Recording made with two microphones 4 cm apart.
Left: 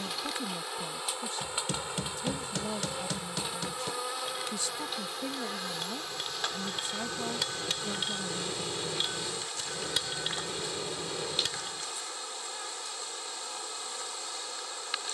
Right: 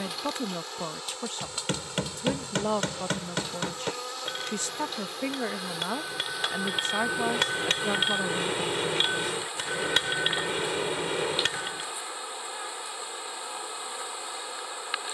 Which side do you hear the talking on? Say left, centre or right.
right.